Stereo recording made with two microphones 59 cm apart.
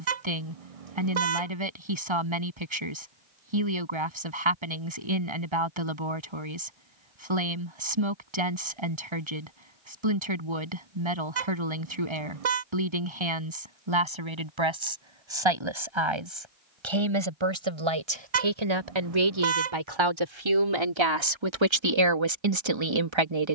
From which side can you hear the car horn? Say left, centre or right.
right.